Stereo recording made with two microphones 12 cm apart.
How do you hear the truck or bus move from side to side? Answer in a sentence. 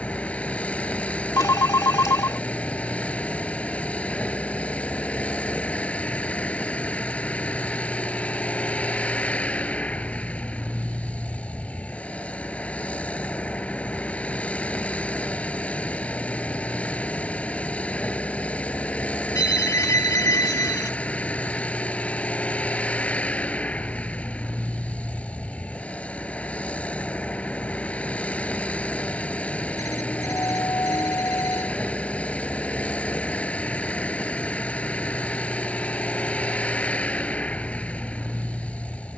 In this clip you hear the truck or bus stay in one place.